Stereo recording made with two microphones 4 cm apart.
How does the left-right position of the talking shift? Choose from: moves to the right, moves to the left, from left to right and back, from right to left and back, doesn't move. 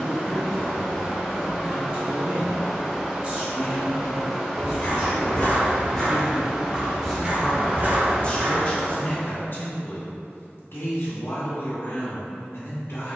moves to the left.